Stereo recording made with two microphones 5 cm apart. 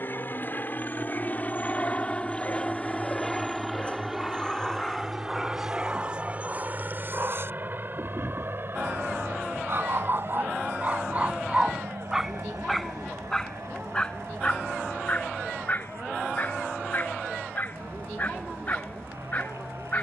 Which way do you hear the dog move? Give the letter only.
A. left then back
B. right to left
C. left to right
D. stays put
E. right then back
E.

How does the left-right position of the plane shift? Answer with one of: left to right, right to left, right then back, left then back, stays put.
left to right.